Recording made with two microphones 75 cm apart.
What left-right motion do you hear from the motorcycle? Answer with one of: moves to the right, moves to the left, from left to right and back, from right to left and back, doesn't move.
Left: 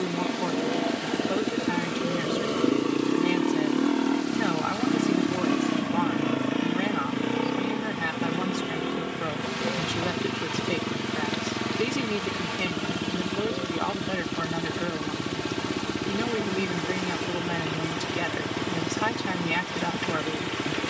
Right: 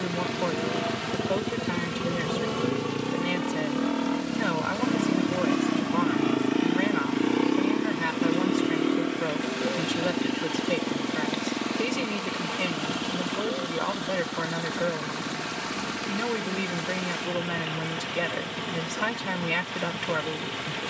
moves to the left.